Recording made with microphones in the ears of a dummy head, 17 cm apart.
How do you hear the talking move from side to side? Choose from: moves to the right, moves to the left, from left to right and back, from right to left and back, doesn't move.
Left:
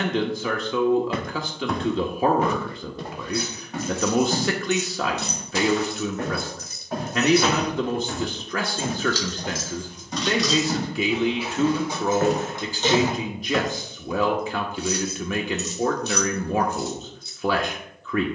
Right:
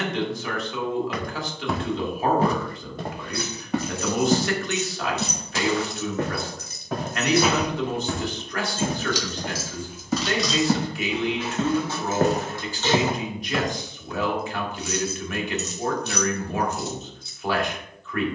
doesn't move.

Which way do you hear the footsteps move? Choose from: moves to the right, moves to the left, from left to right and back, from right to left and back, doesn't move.
from left to right and back.